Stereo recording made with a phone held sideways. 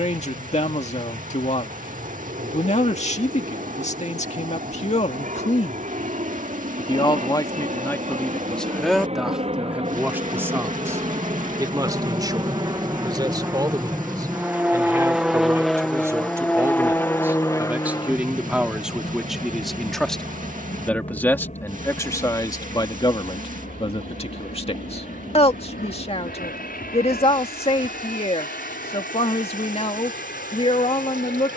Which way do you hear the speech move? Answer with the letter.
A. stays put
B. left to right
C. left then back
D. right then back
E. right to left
D.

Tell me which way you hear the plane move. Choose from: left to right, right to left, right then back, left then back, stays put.
right to left.